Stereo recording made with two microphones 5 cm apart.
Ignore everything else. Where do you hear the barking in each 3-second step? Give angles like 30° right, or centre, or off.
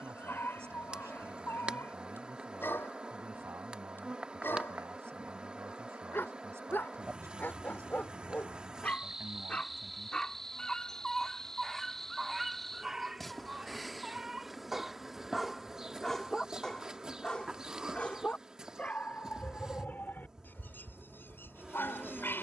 50° left, 50° left, 40° left, 10° left, 10° right, 10° left, 40° left, 50° left.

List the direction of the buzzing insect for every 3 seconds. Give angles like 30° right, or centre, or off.
20° right, 20° right, 20° right, centre, centre, 10° right, 20° right, 20° right.